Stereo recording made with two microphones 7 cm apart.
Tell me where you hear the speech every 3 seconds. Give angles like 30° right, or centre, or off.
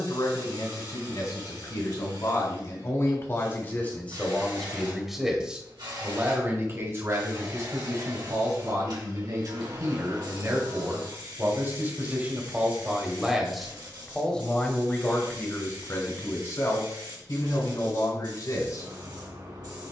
50° left, 10° left, 50° right, 50° right, centre, 40° left, 50° left.